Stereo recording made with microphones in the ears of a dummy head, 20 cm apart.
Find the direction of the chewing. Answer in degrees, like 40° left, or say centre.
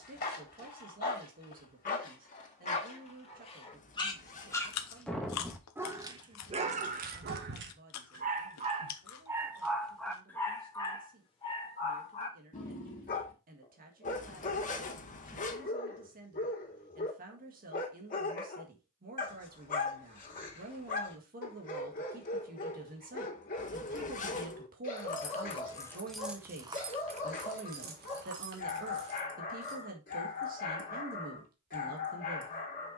80° left.